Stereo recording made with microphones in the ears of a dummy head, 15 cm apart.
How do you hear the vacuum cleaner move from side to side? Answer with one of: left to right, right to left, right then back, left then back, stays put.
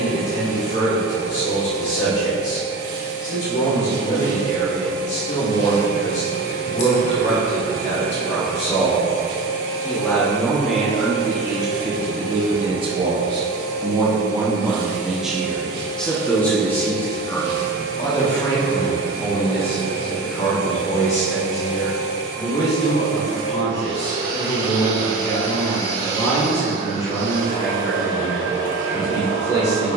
stays put.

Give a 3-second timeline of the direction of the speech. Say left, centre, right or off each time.
left, left, left, centre, right, centre, left, left, left, left.